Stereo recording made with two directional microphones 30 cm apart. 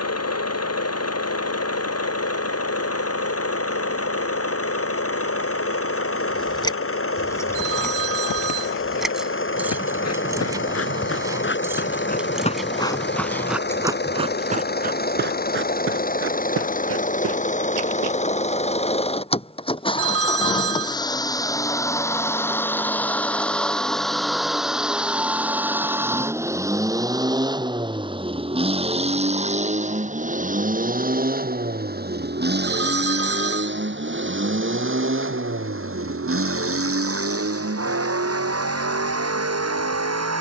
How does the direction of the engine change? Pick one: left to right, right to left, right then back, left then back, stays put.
left to right.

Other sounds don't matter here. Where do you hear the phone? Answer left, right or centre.
right.